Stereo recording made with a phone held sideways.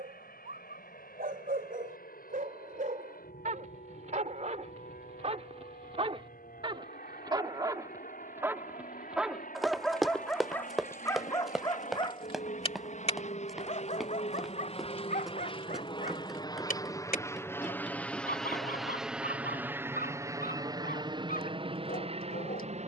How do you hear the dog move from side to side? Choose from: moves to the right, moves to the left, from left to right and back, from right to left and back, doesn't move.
moves to the left.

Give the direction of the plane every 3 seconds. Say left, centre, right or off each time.
left, left, left, left, left, left, centre, right.